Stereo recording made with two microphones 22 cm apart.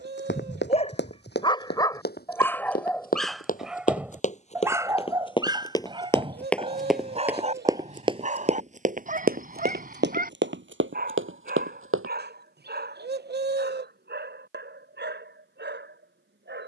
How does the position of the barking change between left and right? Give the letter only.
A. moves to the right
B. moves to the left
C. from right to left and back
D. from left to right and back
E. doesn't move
A.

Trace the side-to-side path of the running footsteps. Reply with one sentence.
You can hear the running footsteps travel towards the right.